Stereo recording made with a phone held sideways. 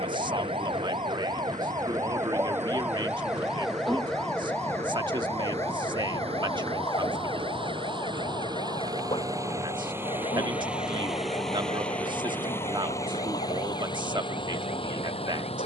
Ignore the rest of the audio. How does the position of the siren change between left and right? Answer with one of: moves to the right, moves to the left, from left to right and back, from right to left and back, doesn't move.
moves to the left.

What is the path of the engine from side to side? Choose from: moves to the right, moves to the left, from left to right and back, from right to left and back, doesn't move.
moves to the left.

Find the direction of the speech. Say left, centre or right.
right.